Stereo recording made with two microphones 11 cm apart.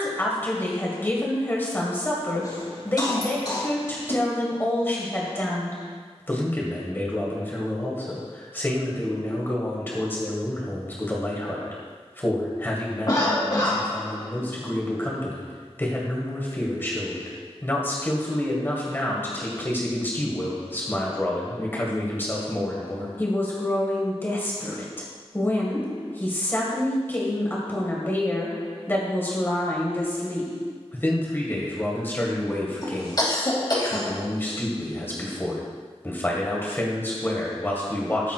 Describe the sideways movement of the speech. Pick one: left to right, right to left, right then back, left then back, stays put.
stays put.